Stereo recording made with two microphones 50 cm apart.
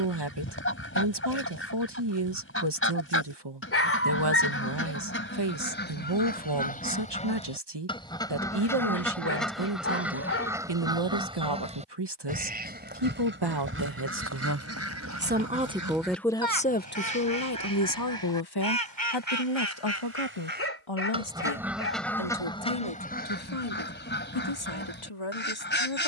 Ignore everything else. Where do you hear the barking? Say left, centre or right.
left.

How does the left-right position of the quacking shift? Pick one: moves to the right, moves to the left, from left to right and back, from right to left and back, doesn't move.
from left to right and back.